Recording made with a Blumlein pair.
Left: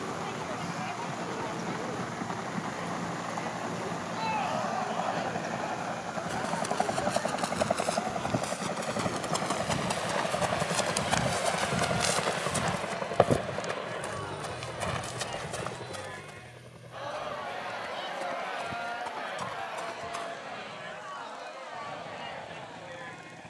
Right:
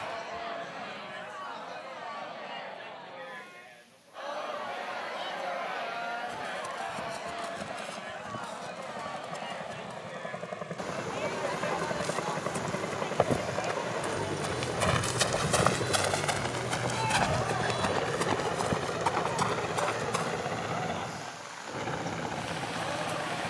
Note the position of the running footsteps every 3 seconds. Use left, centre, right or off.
off, off, left, left, centre, right, right, off.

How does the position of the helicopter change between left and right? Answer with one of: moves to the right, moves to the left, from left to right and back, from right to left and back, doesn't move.
moves to the right.